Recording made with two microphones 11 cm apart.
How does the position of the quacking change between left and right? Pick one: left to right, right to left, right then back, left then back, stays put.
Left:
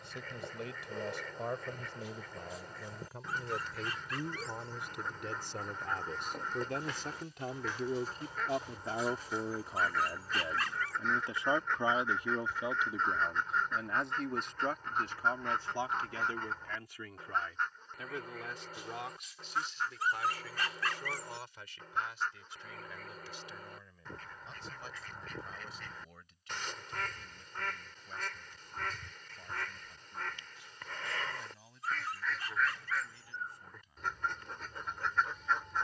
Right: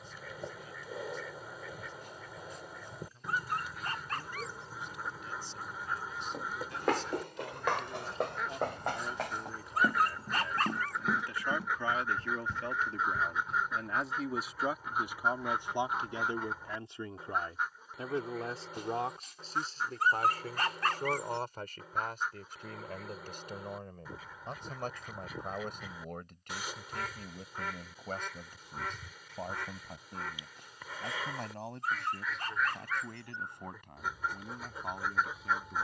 stays put.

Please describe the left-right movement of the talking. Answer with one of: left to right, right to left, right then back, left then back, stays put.
left to right.